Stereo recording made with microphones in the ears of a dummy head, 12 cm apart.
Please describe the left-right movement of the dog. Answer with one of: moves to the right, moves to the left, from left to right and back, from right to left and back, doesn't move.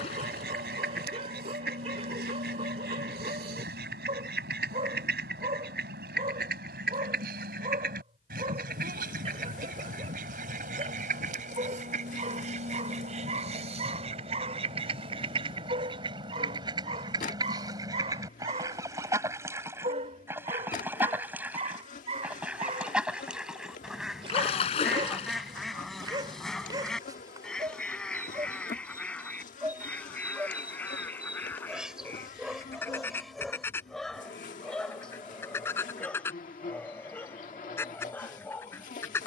moves to the left.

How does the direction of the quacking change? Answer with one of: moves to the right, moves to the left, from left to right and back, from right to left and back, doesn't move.
moves to the left.